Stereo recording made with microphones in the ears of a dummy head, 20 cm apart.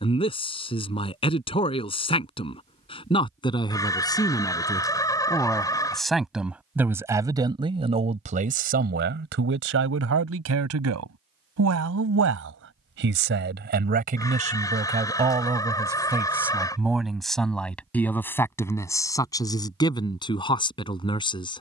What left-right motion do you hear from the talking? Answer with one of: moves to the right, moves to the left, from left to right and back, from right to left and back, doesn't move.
from left to right and back.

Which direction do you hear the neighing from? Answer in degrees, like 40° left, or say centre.
20° left.